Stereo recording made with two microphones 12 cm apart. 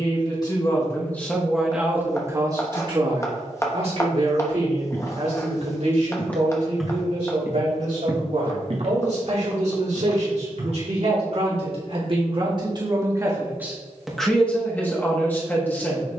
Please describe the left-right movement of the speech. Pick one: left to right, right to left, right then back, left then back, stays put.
right then back.